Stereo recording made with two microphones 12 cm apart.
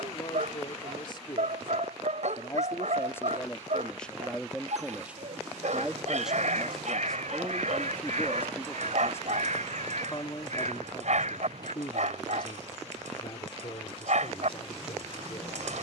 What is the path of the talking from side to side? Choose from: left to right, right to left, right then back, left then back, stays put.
right then back.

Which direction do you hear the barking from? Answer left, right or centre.
right.